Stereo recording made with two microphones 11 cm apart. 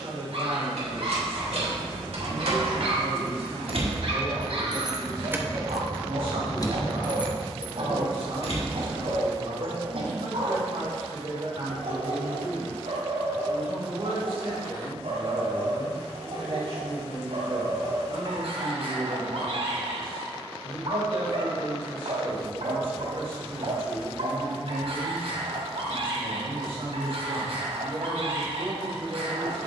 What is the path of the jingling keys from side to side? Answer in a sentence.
In this clip you hear the jingling keys travel towards the left.